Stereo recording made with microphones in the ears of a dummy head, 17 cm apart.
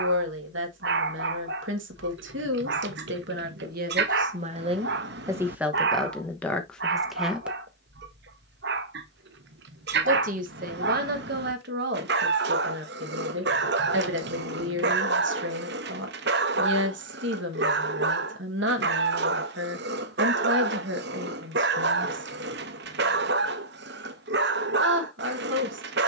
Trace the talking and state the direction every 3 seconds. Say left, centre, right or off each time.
right, right, centre, right, right, right, right, right, right.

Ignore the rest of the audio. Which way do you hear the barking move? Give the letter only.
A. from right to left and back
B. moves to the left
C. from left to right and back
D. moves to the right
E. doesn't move
E.